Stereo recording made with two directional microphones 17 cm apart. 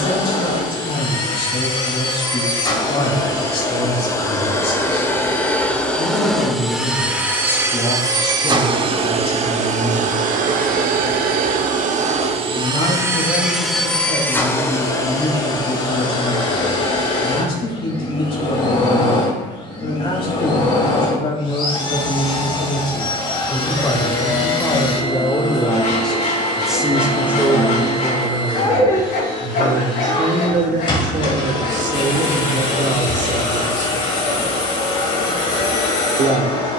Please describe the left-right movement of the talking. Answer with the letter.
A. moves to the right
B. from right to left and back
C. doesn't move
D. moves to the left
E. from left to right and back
A.